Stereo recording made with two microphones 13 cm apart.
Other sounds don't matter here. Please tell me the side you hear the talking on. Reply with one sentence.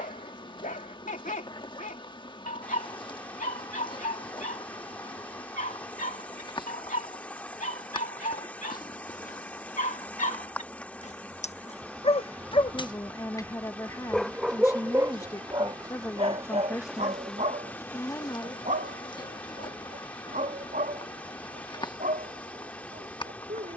You can hear the talking on the left.